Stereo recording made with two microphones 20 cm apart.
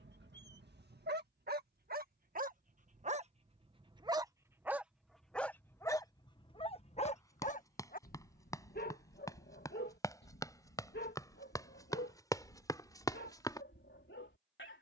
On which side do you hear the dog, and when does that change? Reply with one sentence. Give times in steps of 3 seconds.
You can hear the dog on the right from 0 s, in the centre from 3 s and on the left from 6 s.